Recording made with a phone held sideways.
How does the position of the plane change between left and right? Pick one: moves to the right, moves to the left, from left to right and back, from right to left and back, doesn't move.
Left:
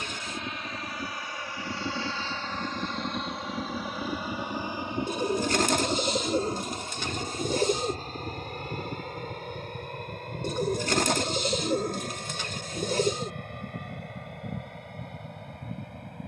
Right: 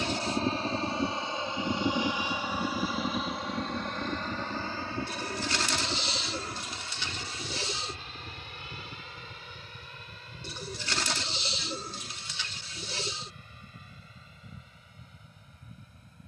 moves to the left.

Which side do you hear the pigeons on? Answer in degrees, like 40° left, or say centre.
50° left.